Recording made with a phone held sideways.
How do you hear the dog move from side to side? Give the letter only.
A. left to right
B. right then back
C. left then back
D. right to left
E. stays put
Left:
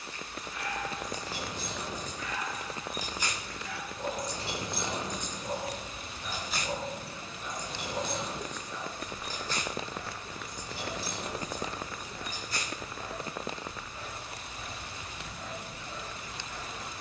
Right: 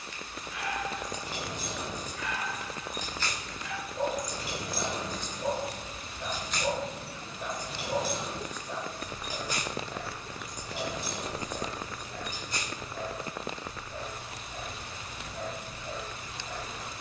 E.